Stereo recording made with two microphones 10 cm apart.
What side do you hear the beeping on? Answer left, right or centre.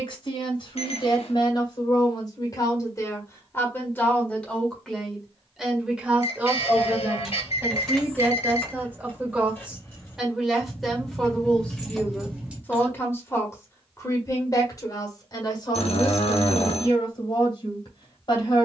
left.